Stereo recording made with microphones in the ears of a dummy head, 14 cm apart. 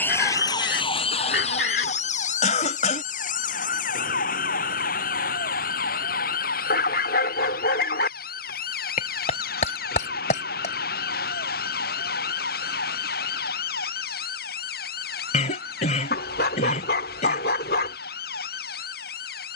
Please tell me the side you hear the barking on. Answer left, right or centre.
left.